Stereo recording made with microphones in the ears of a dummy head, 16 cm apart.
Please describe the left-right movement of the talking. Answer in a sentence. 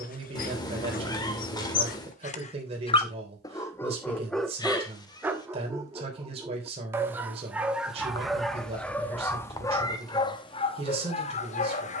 In this clip you hear the talking stay in one place.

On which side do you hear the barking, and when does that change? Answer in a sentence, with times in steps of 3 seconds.
In this clip you hear the barking on the left from 0 s, in the centre from 3 s and on the left from 9 s.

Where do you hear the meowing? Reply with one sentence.
In this clip you hear the meowing on the left.